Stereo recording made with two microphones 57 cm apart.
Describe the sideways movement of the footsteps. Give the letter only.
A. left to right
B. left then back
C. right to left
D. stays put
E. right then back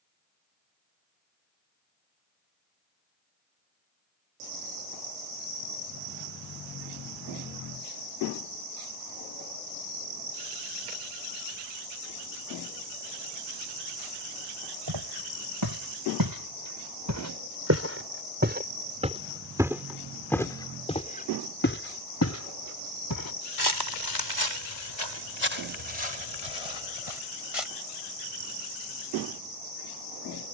C.